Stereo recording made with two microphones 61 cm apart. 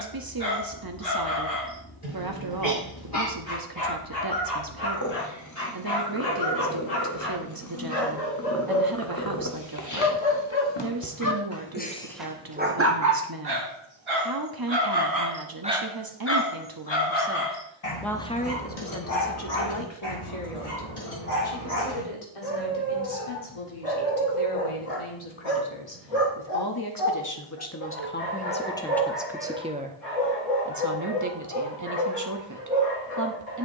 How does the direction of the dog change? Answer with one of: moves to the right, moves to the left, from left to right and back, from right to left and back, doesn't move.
from left to right and back.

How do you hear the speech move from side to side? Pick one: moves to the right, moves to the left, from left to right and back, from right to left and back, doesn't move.
from right to left and back.